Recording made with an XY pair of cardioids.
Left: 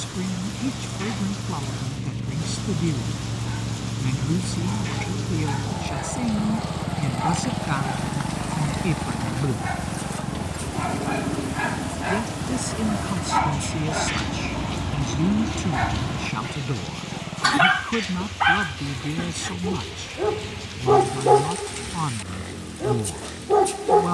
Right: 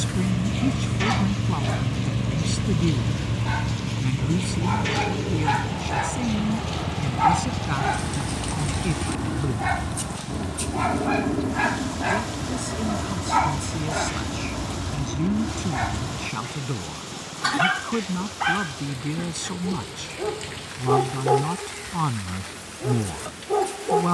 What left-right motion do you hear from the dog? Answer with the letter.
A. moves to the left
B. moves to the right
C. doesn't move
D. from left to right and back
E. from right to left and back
A.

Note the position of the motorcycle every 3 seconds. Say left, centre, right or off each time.
right, centre, left, left, left, left, left, left.